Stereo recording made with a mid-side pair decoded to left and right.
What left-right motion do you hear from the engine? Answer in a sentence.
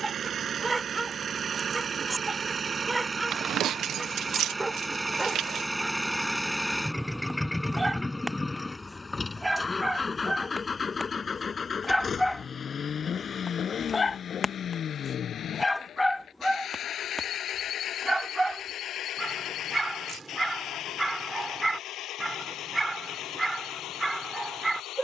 You can hear the engine move from right to left.